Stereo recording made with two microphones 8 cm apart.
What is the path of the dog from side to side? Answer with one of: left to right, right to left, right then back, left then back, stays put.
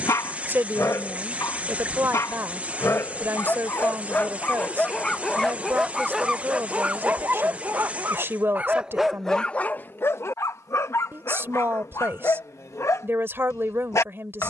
right then back.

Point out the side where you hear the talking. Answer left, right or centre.
right.